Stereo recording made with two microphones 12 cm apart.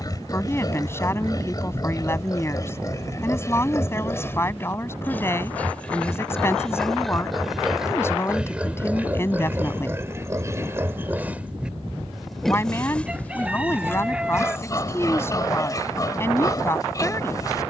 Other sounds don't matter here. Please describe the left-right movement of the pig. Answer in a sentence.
In this clip you hear the pig move from left to right and back again.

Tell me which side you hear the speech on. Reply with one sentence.
In this clip you hear the speech on the left.